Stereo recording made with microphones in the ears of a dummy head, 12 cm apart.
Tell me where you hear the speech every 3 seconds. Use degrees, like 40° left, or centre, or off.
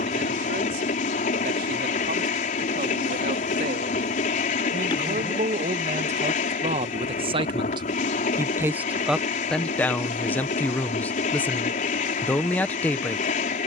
70° right, 60° right, 40° right, 10° left, 10° left.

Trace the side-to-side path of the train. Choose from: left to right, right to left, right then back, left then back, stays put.
stays put.